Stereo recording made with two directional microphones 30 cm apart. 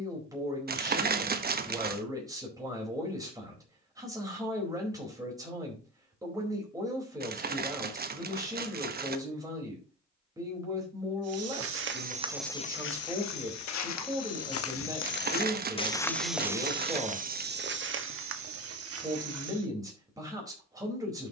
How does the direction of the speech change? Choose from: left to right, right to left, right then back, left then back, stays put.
stays put.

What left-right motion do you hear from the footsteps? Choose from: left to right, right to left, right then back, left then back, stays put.
left then back.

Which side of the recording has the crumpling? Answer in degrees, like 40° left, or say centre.
30° right.